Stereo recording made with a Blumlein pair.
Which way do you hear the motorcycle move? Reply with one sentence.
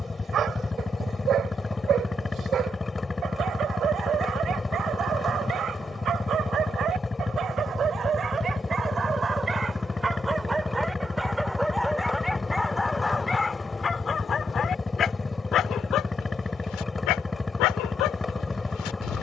In this clip you hear the motorcycle stay in one place.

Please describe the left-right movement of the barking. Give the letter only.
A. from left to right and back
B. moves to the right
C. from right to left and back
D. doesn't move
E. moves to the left
E.